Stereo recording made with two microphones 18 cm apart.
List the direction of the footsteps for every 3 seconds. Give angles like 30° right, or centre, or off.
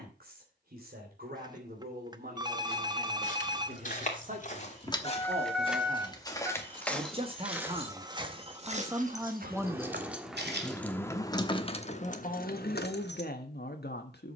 off, 40° left, 10° right, 60° right, off.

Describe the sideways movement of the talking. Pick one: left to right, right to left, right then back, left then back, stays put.
right to left.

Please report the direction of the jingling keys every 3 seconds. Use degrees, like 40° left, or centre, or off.
off, 30° left, 30° right, 10° left, 60° left.